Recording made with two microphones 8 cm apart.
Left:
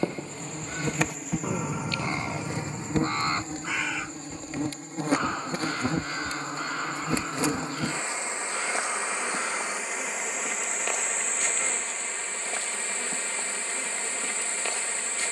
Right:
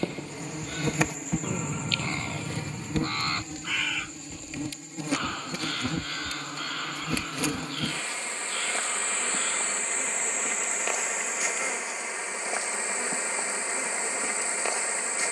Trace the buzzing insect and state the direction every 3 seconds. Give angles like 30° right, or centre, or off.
10° left, 40° left, 30° left, centre, 20° right.